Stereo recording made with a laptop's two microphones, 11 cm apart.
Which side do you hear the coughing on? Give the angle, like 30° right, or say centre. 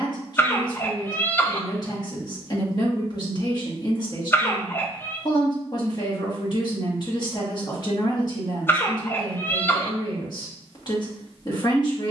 20° left.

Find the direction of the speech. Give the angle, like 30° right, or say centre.
40° left.